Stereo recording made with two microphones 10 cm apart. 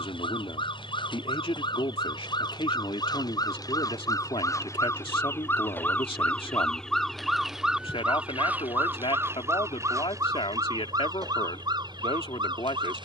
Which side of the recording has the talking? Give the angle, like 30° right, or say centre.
70° left.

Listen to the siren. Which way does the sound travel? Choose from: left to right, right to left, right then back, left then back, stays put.
left to right.